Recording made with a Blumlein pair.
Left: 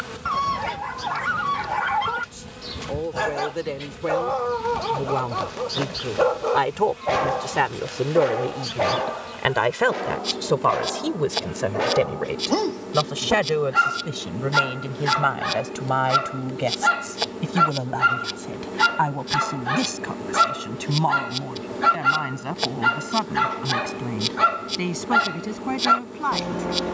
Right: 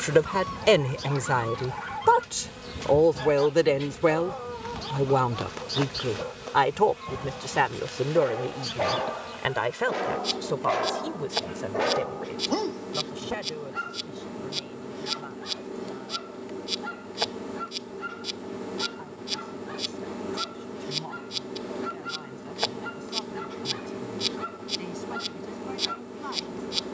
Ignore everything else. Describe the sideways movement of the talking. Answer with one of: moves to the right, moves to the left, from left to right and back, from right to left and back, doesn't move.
moves to the left.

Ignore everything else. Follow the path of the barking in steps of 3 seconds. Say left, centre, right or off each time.
left, left, left, centre, left, left, left, left, left.